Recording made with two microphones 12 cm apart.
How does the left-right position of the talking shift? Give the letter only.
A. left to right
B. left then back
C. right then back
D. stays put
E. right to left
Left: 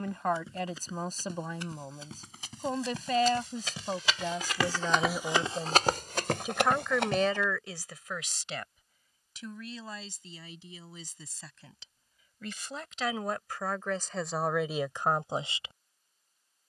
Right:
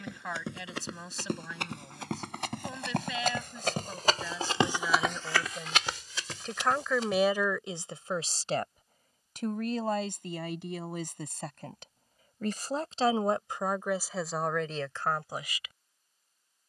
C.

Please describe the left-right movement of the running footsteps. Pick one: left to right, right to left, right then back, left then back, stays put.
right to left.